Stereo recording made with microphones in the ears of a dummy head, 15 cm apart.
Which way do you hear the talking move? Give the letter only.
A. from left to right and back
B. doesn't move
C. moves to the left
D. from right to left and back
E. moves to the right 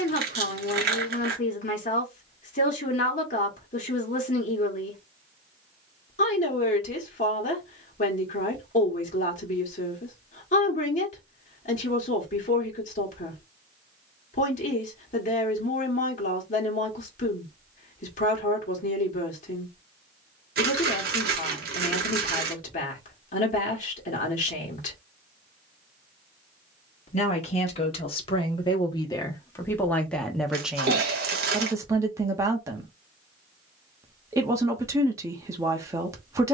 E.